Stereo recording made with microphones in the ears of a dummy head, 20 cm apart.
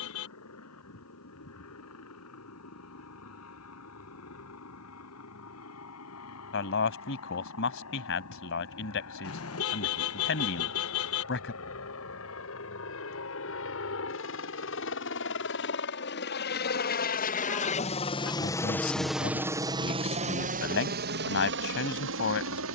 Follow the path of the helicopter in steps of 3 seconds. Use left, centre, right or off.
left, left, left, left, left, left, centre, right.